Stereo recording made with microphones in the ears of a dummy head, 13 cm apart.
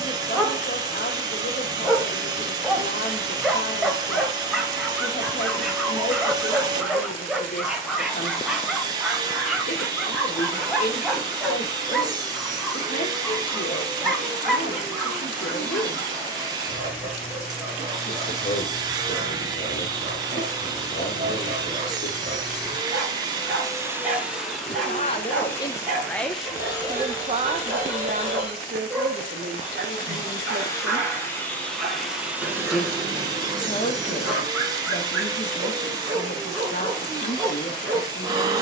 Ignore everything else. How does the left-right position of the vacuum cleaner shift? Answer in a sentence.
In this clip you hear the vacuum cleaner move from right to left and back again.